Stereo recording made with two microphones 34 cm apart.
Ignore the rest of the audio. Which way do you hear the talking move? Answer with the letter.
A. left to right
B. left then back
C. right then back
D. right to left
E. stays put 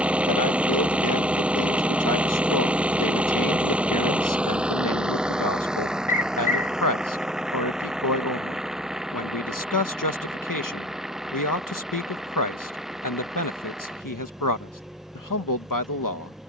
E.